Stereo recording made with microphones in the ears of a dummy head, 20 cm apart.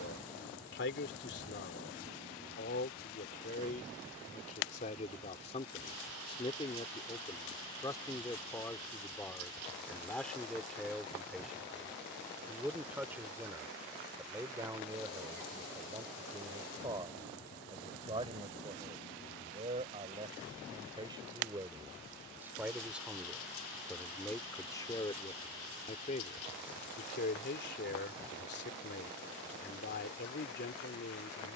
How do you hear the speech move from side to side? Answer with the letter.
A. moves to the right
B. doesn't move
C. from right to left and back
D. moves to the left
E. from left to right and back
E.